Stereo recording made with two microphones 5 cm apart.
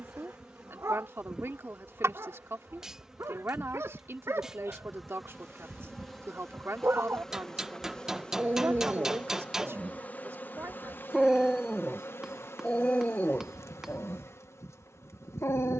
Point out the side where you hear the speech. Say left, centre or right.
right.